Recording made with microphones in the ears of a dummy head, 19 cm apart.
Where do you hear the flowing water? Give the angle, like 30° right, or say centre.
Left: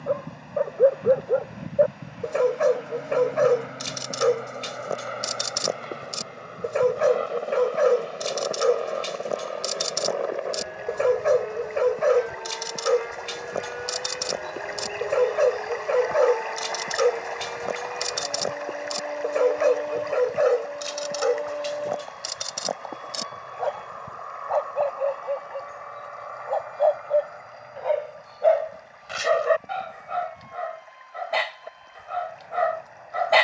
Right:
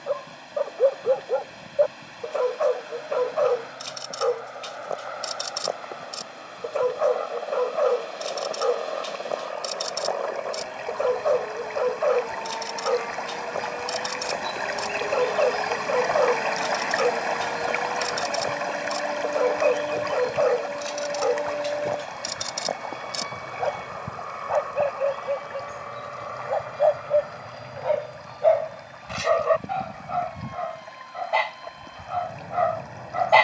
70° right.